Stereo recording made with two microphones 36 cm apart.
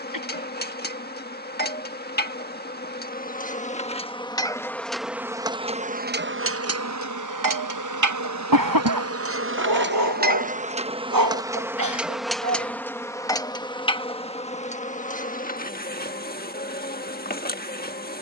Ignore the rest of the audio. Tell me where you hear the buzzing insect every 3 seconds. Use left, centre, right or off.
left, centre, right, right, centre, left.